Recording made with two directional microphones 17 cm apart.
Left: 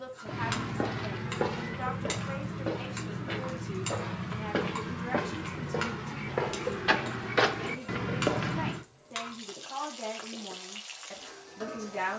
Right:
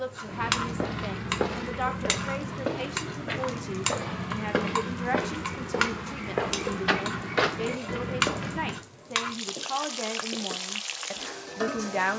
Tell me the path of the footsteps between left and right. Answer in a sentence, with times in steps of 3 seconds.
You can hear the footsteps on the right from 0 s, in the centre from 6 s and not at all from 9 s.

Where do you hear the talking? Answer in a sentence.
In this clip you hear the talking on the right.